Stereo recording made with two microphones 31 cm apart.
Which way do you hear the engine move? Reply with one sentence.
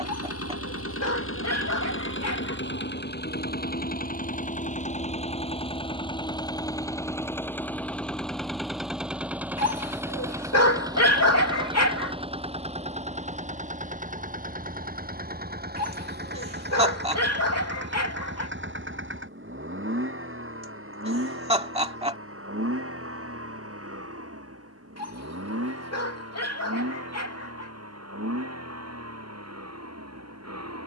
In this clip you hear the engine move from left to right.